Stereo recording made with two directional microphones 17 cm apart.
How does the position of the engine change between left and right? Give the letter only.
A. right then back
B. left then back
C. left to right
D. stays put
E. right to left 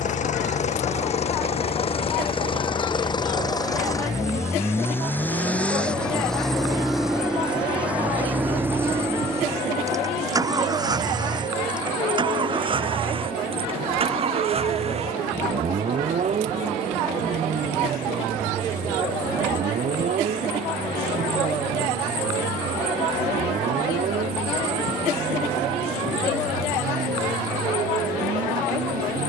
C.